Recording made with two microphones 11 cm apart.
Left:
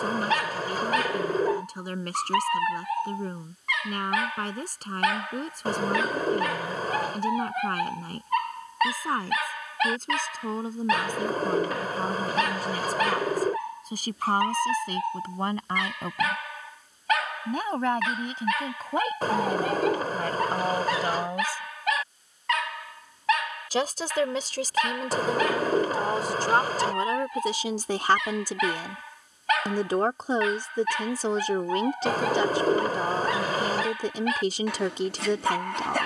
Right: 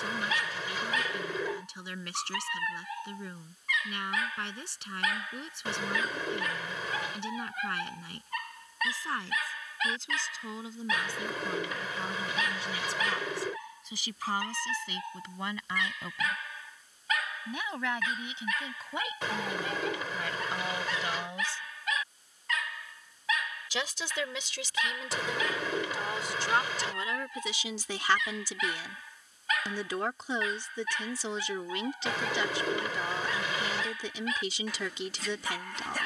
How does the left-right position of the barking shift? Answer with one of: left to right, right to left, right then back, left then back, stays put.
stays put.